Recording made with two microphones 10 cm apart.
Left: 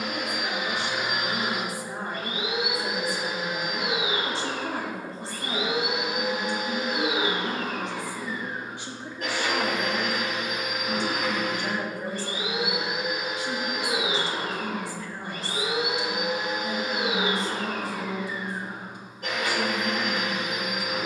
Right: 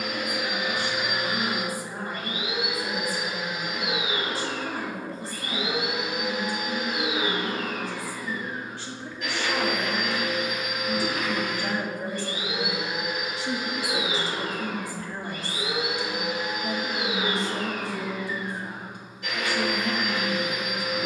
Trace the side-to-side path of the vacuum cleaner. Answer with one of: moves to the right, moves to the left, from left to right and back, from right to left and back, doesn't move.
doesn't move.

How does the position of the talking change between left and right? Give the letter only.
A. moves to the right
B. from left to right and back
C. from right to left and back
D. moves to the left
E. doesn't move
A.